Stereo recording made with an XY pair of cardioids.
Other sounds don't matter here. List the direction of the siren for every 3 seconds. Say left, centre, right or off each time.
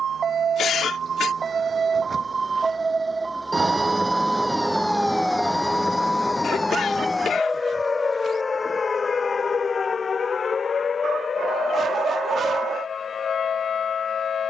right, centre, left, left, left.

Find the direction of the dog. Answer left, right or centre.
right.